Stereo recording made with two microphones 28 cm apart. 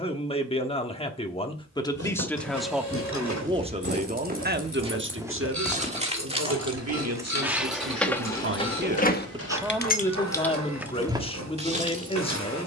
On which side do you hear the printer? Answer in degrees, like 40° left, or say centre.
80° right.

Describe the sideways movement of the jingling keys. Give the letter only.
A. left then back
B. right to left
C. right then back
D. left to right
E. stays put
A.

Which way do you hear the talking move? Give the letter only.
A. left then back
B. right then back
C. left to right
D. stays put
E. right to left
B.